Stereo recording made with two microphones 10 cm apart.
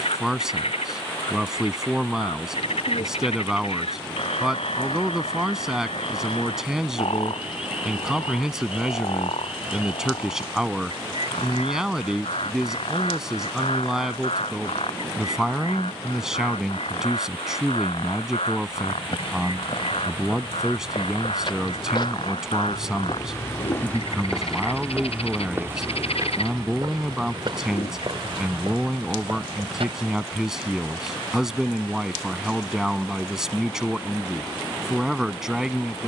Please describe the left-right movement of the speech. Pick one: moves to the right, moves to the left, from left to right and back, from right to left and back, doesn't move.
doesn't move.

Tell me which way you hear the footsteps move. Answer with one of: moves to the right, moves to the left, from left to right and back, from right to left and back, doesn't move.
moves to the right.